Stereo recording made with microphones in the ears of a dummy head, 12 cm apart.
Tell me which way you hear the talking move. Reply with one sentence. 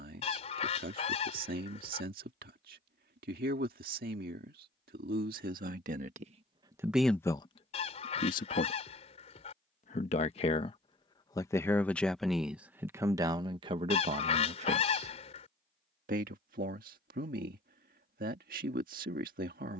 In this clip you hear the talking move from right to left and back again.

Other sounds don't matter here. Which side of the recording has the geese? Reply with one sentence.
In this clip you hear the geese on the left.